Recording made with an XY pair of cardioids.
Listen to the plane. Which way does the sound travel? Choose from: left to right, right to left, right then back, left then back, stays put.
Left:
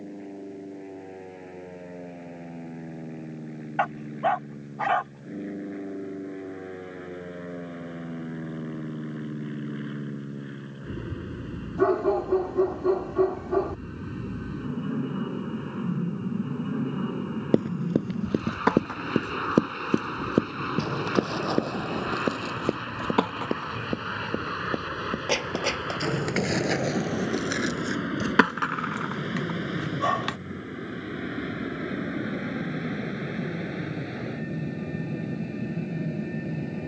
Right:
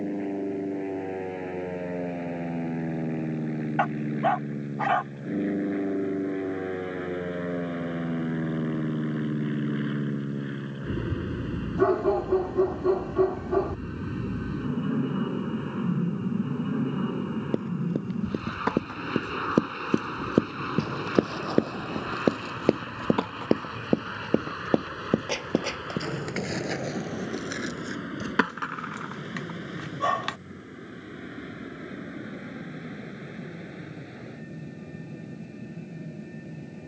right to left.